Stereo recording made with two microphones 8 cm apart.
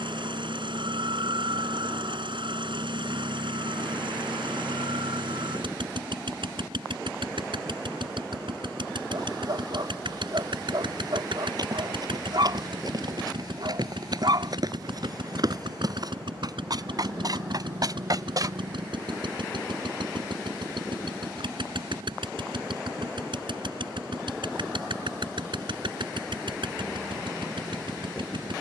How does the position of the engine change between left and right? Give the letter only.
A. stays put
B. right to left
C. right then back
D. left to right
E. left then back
A.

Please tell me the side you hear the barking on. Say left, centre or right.
right.